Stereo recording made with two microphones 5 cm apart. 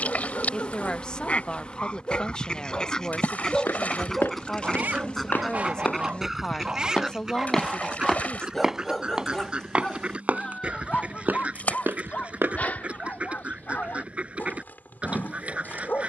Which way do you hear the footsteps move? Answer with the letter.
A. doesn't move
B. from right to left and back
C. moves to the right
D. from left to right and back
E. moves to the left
C.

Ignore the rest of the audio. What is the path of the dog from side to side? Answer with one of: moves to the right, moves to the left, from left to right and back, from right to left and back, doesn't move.
from left to right and back.